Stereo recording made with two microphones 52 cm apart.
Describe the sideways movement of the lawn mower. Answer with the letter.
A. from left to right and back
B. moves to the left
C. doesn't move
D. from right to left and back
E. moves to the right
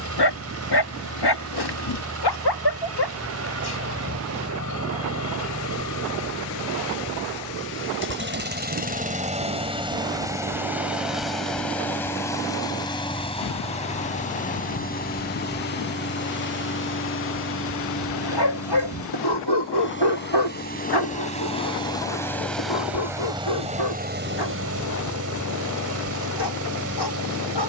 D.